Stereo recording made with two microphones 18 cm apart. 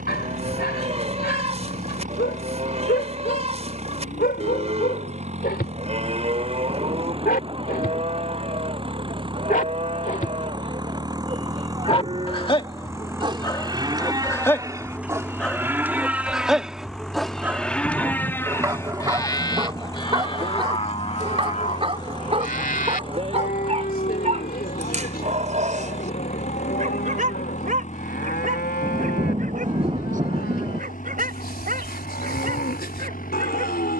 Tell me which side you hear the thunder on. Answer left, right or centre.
right.